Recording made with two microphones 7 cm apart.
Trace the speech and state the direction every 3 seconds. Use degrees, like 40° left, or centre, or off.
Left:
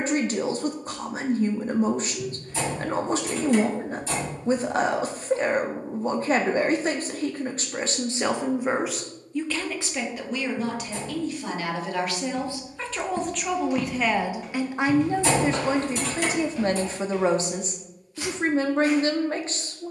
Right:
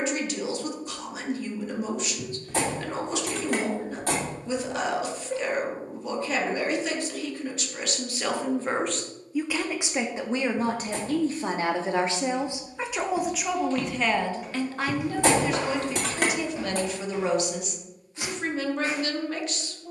40° left, 40° left, 30° left, 30° right, centre, 30° left, 30° left.